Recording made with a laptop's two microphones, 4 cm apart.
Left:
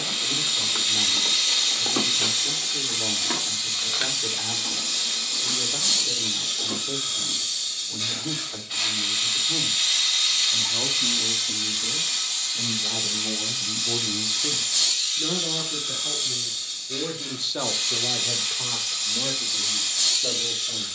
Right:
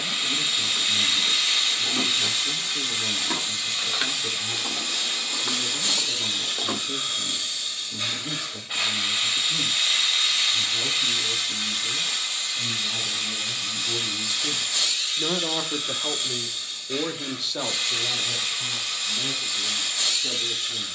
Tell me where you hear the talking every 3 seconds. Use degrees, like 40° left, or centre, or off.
70° left, 70° left, 70° left, 70° left, 30° left, 20° right, 60° left.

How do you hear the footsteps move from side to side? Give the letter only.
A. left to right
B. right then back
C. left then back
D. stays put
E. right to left
A.